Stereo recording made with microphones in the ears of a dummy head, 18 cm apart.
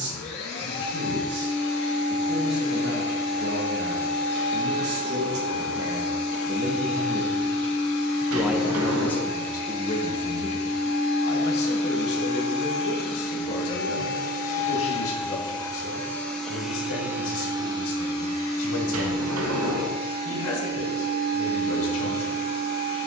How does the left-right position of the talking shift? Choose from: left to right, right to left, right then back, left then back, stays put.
right to left.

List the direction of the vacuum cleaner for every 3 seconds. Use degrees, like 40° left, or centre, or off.
60° left, 60° left, 60° left, 60° left, 50° left, centre, 40° right, 50° right.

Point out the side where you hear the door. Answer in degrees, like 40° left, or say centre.
70° right.